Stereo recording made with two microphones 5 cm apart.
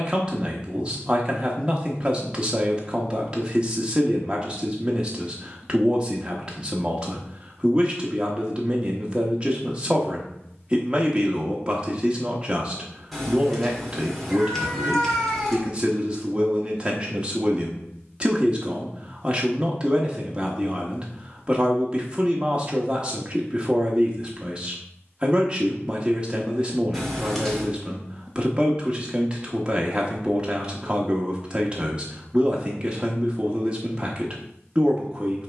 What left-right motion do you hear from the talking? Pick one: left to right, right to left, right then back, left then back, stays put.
stays put.